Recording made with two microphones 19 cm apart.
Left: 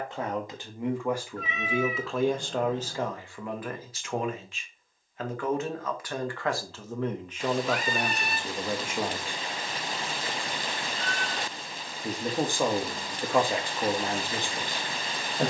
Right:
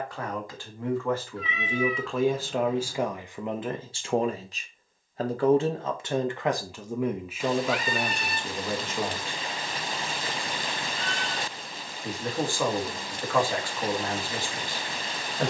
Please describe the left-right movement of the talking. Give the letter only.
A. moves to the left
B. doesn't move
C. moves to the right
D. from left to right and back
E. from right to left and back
D.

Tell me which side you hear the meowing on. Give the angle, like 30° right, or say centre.
50° left.